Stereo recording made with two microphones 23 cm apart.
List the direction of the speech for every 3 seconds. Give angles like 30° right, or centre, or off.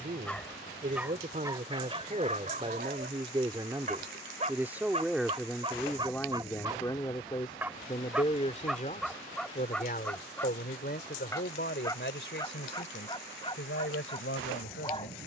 30° right, 10° right, 20° left, 50° left, 60° left.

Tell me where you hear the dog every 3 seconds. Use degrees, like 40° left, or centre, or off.
20° right, 30° right, 10° right, 10° left, 20° left.